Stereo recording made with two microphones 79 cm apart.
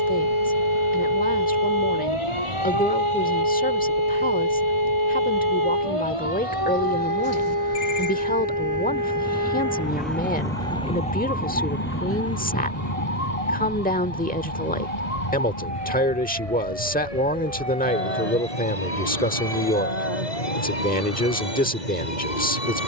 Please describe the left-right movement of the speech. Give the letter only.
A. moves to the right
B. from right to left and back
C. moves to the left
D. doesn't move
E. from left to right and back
D.